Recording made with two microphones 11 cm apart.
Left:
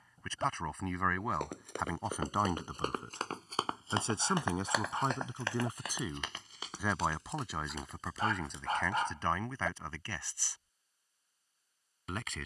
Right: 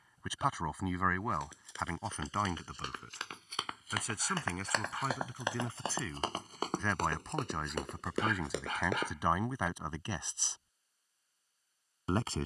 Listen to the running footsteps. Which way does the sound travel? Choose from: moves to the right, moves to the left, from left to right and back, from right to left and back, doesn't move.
moves to the right.